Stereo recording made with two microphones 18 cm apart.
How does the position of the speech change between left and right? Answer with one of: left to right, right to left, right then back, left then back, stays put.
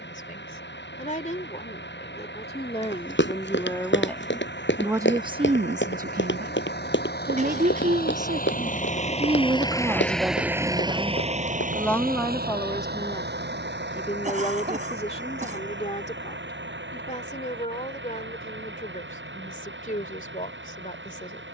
right then back.